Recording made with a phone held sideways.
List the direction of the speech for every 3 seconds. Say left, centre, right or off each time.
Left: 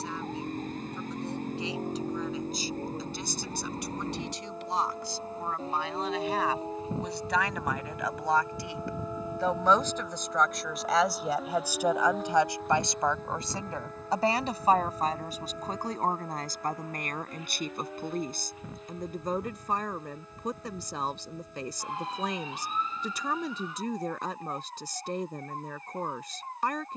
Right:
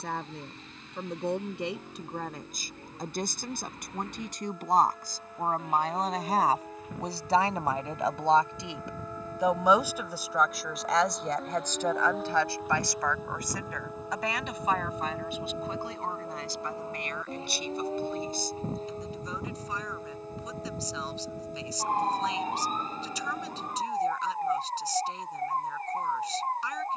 right, right, right, centre, left, left, left, left, left.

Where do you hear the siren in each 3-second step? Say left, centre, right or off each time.
left, left, left, centre, centre, right, right, right, right.